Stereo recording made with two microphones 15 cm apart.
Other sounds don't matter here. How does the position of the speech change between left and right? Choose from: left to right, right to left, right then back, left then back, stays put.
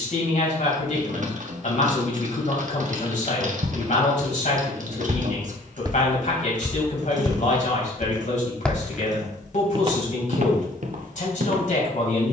stays put.